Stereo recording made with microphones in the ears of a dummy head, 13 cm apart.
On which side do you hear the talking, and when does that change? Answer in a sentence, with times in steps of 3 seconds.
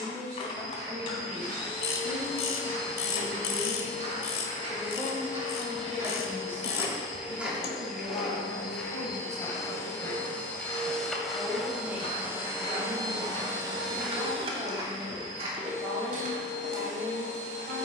You can hear the talking on the right from 0 s, in the centre from 3 s, on the left from 6 s, in the centre from 9 s and on the right from 12 s.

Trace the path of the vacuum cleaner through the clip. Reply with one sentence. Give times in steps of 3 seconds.
In this clip you hear the vacuum cleaner on the left from 0 s, in the centre from 9 s and on the right from 12 s.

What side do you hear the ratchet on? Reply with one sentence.
You can hear the ratchet on the left.